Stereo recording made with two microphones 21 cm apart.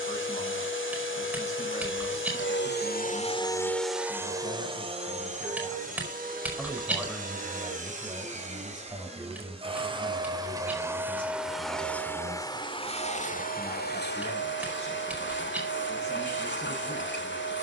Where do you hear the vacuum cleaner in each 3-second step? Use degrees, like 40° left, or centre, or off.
60° left, 10° right, 40° right, 20° right, 40° left, 60° left.